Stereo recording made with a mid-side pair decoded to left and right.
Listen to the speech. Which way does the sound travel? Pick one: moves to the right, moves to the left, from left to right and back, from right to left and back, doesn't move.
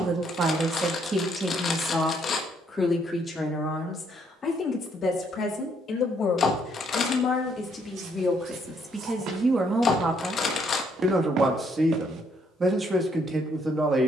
from right to left and back.